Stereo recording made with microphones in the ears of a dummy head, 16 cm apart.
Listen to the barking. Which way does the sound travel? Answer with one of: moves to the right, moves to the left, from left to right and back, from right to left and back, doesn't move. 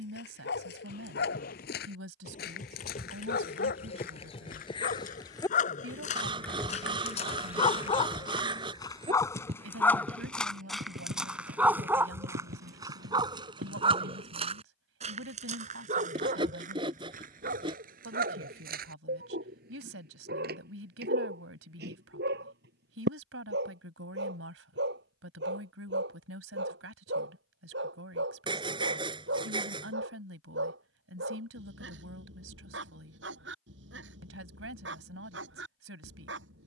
moves to the right.